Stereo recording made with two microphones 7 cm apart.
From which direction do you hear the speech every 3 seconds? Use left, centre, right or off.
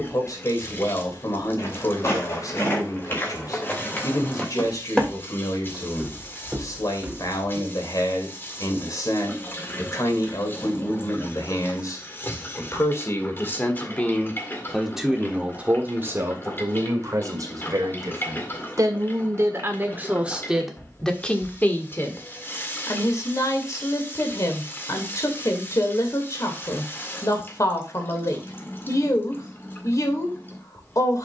left, left, left, left, left, right, right, left, left, left, left.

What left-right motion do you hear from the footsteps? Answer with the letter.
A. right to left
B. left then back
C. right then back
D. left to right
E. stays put
D.